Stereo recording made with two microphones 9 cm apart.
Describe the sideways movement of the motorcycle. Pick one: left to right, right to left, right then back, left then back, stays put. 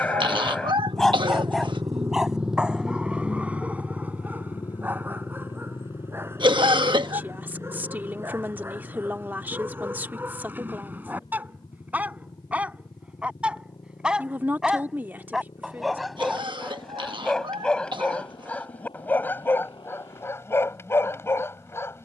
right to left.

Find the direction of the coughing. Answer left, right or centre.
right.